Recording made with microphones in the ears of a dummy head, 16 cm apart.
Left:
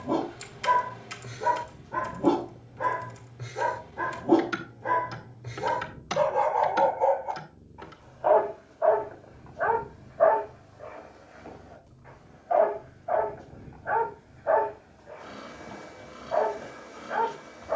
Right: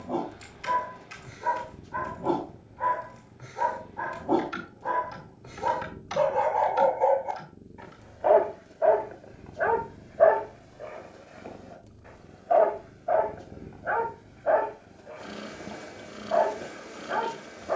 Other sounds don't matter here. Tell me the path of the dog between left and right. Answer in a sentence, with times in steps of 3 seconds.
In this clip you hear the dog on the left from 0 s, in the centre from 6 s and on the right from 9 s.